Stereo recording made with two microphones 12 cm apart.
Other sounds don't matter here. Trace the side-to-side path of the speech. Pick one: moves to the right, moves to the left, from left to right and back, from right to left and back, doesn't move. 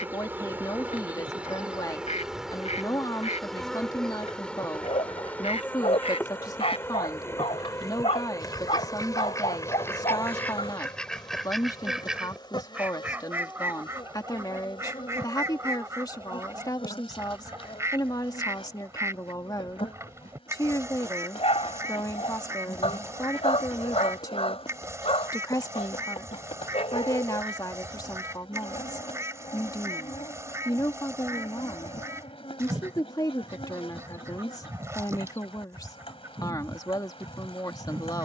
doesn't move.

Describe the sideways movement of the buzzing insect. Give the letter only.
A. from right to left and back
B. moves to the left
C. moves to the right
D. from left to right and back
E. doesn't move
B.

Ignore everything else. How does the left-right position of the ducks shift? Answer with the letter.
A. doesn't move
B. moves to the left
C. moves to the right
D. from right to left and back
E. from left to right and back
C.